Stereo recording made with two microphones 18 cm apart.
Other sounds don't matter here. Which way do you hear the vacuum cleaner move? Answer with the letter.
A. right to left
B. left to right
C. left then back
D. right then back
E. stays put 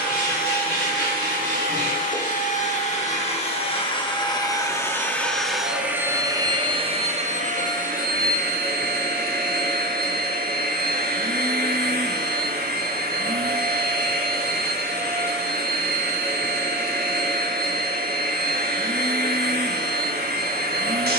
B.